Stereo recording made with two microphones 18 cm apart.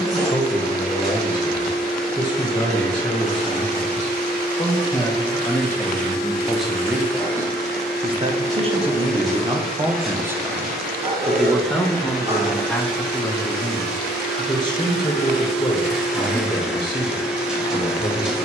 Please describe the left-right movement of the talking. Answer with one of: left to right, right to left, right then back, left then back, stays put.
right then back.